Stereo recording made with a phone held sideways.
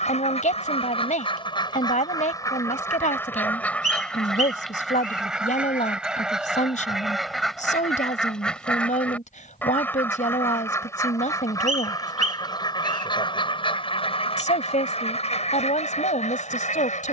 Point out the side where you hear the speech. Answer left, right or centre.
left.